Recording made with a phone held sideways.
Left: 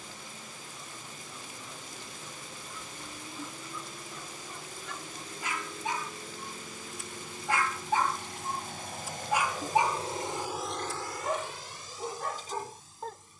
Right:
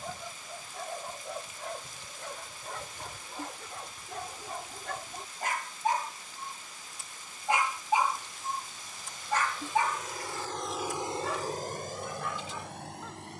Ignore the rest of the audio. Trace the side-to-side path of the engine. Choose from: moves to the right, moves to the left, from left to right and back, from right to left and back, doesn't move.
moves to the right.